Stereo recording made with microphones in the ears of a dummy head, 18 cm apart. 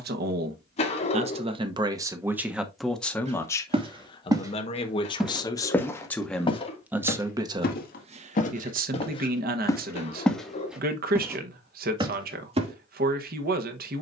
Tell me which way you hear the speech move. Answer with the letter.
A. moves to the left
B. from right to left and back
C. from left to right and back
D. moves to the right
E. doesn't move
B.